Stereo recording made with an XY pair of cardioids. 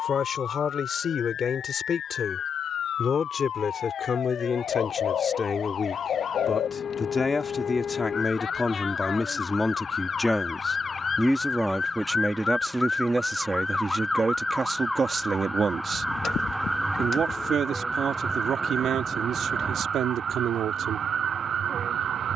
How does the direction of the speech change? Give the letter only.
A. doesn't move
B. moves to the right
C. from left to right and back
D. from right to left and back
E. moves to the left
B.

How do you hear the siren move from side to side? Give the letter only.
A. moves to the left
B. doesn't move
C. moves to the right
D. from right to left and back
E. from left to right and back
C.